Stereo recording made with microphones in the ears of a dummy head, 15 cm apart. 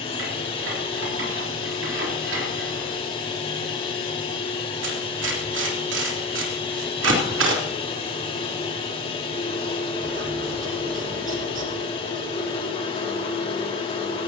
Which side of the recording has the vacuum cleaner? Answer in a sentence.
In this clip you hear the vacuum cleaner on the left.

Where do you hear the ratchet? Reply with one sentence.
You can hear the ratchet on the right.